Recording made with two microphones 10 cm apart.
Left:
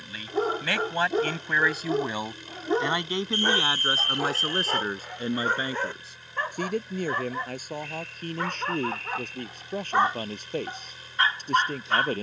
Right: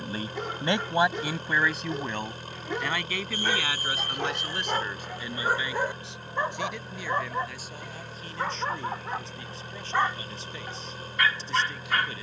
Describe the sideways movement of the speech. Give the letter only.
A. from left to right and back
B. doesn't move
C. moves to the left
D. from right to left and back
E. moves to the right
C.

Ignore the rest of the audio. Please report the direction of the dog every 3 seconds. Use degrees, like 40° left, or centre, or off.
40° left, centre, 10° right, 20° left.